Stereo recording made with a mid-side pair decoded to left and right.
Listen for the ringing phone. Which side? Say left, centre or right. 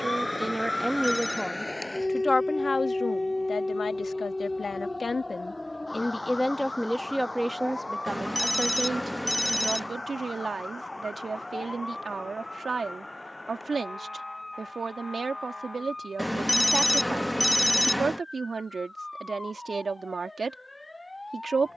centre.